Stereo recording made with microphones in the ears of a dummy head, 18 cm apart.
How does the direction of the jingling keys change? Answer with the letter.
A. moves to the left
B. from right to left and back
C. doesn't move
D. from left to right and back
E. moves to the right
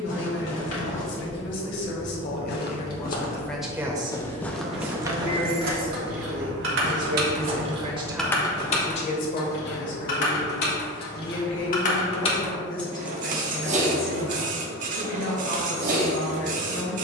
B.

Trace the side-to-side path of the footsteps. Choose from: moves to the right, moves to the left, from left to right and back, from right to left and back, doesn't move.
moves to the right.